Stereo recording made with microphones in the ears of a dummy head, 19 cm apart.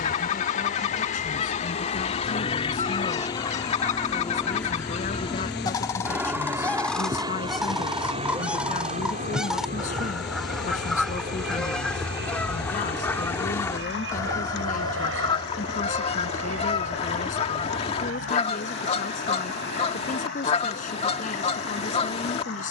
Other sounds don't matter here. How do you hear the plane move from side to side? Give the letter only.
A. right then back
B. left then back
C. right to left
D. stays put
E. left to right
E.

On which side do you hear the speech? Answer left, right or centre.
left.